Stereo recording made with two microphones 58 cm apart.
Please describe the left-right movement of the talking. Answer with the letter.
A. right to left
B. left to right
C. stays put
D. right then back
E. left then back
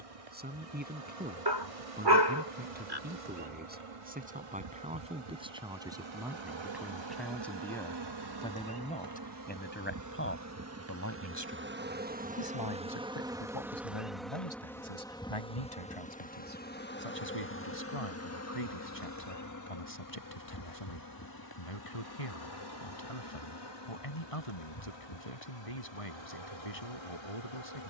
A.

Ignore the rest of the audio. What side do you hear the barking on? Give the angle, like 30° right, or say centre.
40° right.